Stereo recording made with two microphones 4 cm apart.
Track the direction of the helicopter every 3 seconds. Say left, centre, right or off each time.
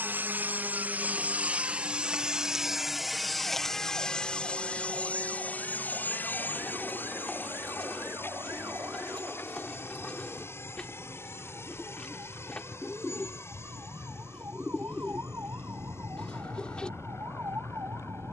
right, left, left, left, left, left.